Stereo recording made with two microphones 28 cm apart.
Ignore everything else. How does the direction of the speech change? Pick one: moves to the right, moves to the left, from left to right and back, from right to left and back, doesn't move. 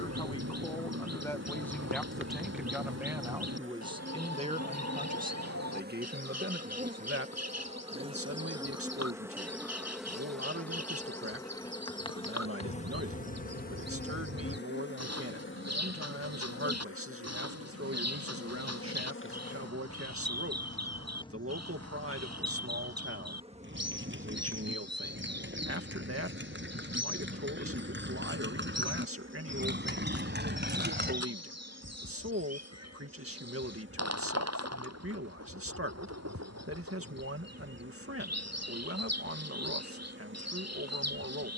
moves to the right.